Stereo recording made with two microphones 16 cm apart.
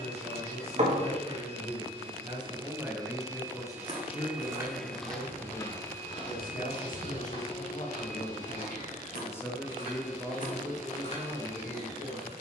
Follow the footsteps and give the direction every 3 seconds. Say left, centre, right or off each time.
off, centre, left, left.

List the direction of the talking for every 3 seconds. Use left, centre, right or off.
right, left, left, centre.